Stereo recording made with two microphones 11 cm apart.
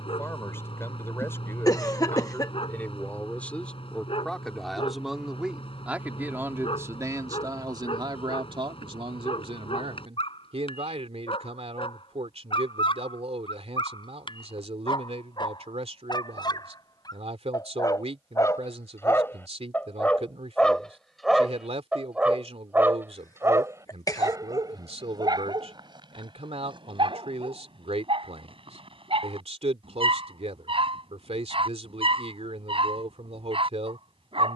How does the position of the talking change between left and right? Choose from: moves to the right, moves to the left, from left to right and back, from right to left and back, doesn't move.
moves to the right.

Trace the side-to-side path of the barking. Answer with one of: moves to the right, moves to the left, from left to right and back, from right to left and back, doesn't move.
moves to the right.